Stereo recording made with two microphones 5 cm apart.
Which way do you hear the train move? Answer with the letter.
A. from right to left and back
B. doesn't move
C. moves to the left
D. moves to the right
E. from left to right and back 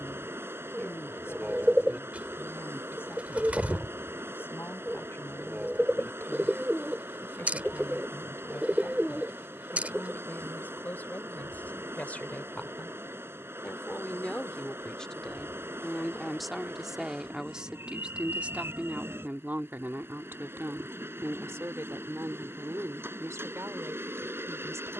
B.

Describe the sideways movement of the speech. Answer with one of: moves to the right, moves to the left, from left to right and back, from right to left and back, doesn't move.
moves to the right.